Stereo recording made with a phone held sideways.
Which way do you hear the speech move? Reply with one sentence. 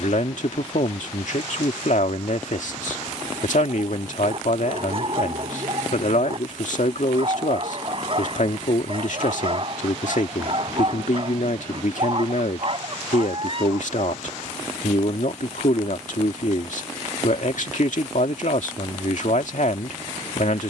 You can hear the speech stay put.